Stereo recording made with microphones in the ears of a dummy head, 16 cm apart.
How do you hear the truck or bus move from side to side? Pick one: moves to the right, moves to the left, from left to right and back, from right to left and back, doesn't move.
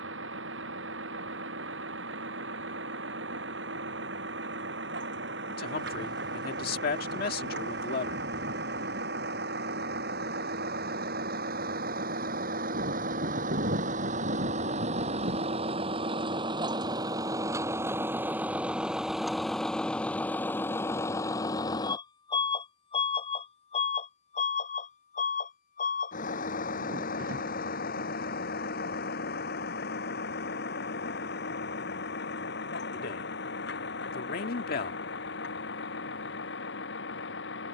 moves to the left.